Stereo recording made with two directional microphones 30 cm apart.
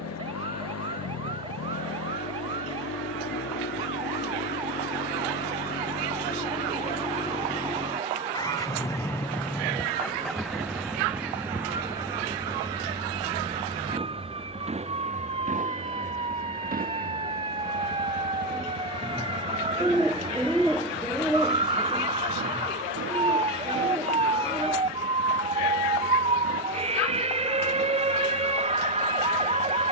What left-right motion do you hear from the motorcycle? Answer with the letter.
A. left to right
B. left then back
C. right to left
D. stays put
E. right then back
A.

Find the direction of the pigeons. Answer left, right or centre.
centre.